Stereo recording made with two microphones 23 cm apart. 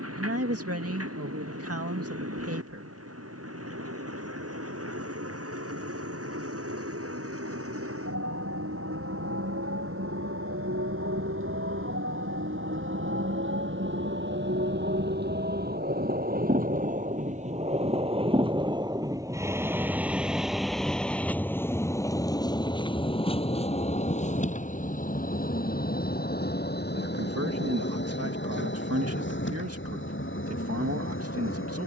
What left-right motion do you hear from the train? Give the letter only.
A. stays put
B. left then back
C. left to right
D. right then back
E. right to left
E.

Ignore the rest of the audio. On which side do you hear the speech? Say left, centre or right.
right.